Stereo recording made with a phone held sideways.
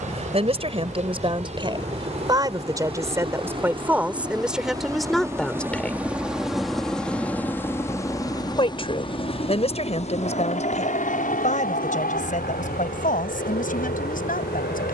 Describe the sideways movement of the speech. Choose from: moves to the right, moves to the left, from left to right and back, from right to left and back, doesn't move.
moves to the left.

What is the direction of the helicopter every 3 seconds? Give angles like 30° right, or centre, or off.
50° right, 20° right, 10° left, 50° left, 60° left.